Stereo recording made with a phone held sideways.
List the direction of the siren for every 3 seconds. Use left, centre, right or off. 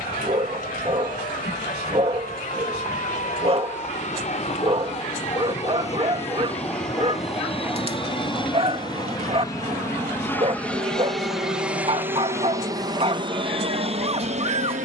left, left, centre, right, right.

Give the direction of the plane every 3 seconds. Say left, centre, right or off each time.
left, left, left, centre, right.